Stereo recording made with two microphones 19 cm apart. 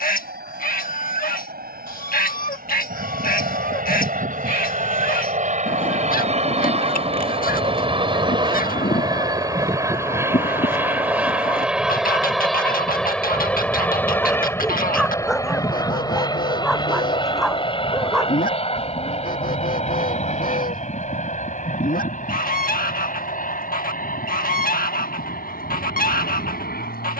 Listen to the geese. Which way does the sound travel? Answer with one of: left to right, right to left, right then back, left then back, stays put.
stays put.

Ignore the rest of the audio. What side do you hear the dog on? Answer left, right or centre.
centre.